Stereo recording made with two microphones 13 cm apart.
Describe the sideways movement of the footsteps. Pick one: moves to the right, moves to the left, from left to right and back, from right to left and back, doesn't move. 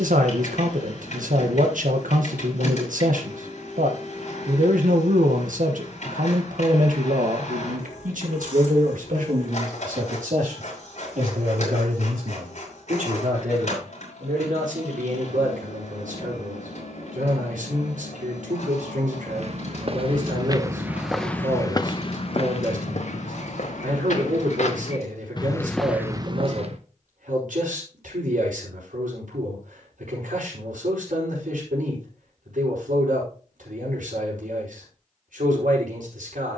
from right to left and back.